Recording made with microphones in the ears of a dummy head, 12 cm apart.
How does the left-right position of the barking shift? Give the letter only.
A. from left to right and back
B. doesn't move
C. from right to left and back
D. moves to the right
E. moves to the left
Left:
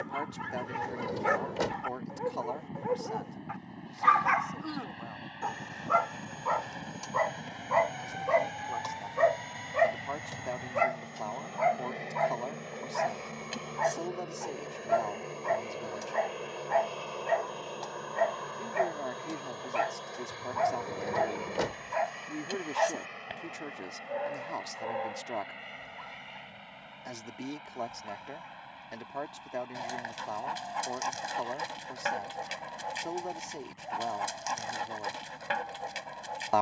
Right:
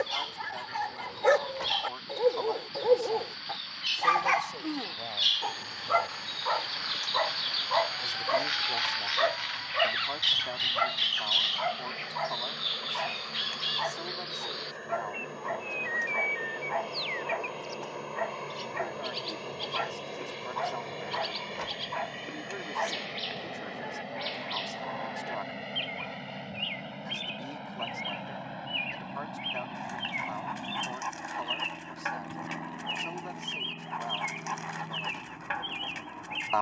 E.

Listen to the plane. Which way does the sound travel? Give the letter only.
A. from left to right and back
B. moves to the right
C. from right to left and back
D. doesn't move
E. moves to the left
B.